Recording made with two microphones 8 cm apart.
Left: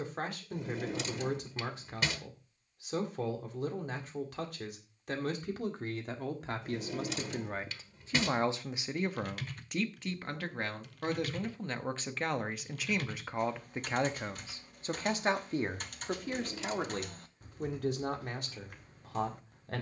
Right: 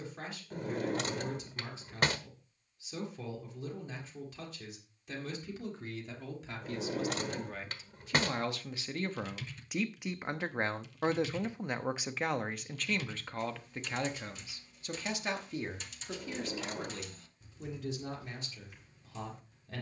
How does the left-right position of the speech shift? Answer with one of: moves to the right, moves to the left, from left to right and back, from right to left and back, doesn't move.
from left to right and back.